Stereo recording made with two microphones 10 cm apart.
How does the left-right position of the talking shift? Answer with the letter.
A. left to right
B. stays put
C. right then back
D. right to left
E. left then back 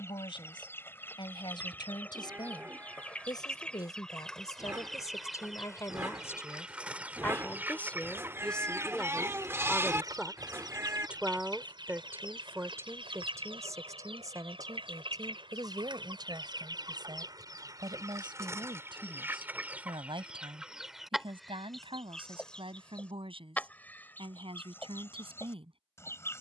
A.